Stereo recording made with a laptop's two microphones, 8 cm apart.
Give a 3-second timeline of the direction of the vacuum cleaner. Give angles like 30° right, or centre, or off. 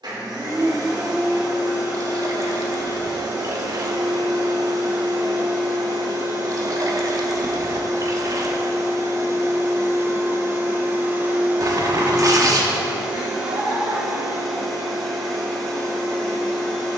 70° right, 70° right, 60° right, 30° right, 10° right, 10° left.